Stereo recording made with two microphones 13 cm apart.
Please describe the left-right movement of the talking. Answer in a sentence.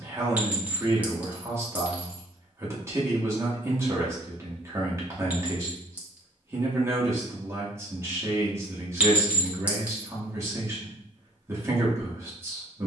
In this clip you hear the talking stay in one place.